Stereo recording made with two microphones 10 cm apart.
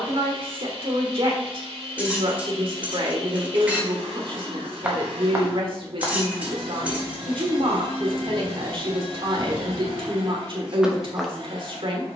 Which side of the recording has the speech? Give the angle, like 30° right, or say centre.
60° right.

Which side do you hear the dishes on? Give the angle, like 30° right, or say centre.
10° right.